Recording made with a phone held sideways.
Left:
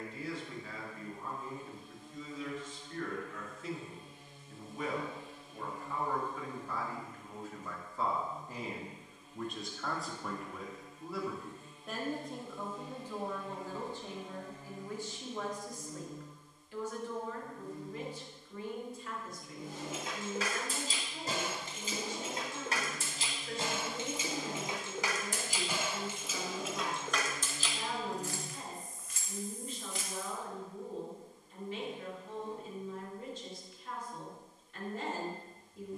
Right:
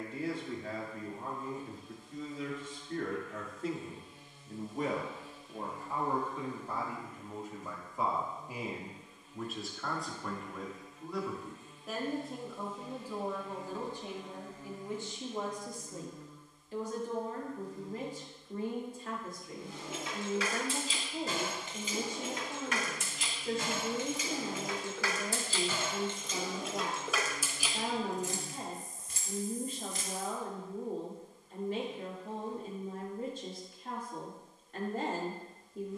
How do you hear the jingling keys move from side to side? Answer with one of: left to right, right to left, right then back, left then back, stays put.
left to right.